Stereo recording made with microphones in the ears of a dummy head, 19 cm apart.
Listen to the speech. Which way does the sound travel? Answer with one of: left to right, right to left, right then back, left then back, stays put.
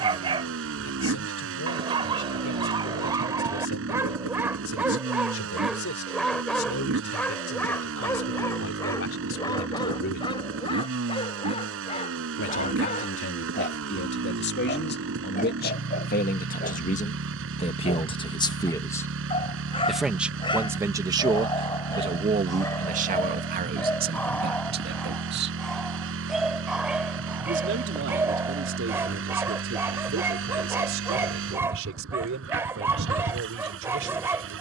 left to right.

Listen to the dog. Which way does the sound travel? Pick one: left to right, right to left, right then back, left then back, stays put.
left then back.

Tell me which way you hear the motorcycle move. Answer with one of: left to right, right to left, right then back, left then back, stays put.
stays put.